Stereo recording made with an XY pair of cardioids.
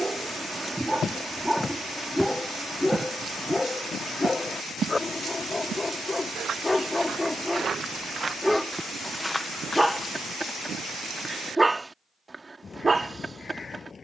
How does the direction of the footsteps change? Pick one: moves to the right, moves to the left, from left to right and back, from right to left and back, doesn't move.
from left to right and back.